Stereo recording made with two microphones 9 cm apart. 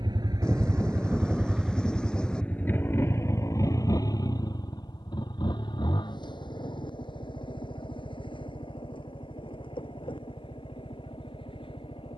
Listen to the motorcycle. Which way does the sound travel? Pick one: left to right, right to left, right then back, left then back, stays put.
right to left.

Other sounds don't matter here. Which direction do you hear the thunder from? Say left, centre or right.
centre.